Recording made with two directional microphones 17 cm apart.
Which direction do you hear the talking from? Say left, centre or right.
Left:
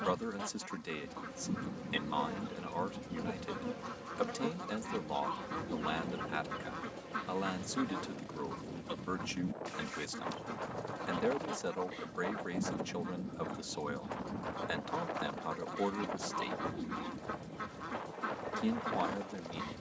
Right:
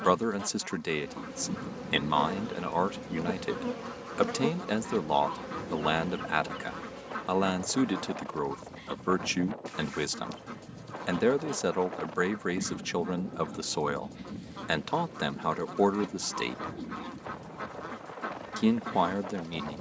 right.